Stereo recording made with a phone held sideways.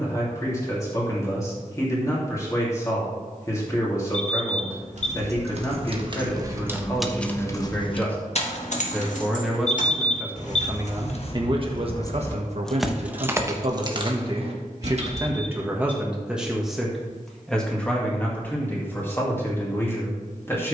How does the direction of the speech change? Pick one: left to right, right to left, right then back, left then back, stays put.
right then back.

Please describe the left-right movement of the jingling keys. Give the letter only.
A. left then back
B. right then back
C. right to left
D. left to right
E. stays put
A.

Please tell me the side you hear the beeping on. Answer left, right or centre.
left.